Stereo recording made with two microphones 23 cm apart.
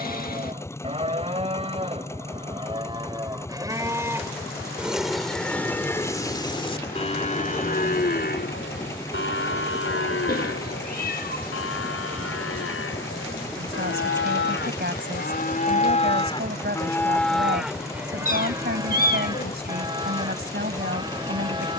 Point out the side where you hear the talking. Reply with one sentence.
You can hear the talking on the right.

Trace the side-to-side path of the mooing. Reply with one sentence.
You can hear the mooing move from right to left and back again.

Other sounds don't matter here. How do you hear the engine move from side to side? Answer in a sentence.
In this clip you hear the engine stay put.